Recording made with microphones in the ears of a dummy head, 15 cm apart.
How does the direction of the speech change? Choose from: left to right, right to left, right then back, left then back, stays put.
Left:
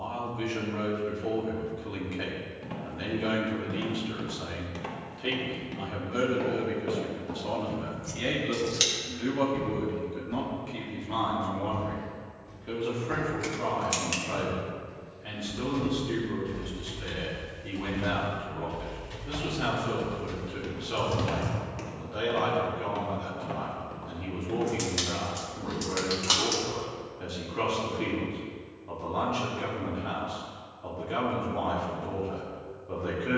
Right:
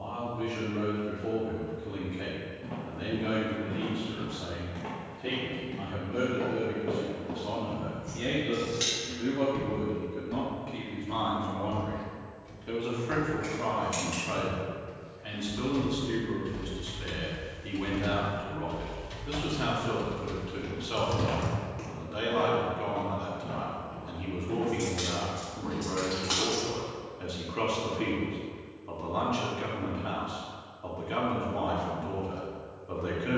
left to right.